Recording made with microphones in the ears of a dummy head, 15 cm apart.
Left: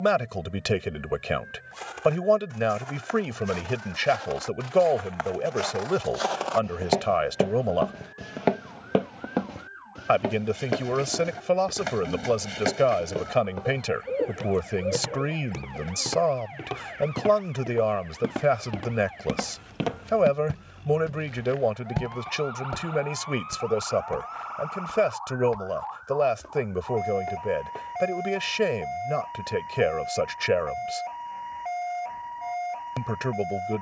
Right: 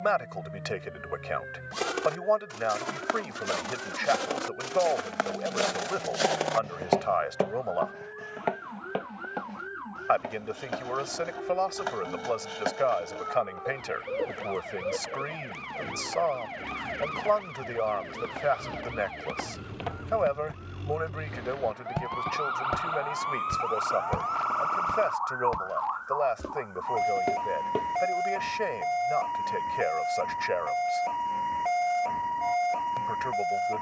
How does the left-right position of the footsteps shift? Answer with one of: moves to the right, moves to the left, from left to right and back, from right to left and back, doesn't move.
from right to left and back.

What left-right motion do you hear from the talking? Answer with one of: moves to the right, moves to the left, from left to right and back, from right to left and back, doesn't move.
doesn't move.